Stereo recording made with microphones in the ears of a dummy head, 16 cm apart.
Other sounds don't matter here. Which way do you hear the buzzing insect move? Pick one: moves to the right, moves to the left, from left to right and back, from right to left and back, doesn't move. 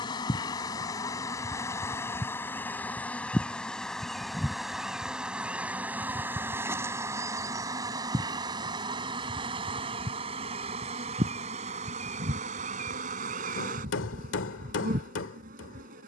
moves to the right.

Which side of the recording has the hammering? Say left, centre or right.
left.